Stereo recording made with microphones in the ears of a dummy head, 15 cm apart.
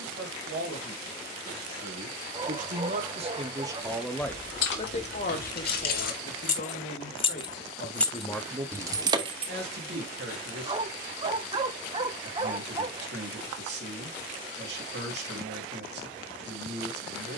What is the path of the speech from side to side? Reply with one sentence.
In this clip you hear the speech move from right to left and back again.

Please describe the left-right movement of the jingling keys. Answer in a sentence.
You can hear the jingling keys go from the left side to the right.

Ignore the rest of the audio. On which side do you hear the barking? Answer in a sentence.
In this clip you hear the barking on the right.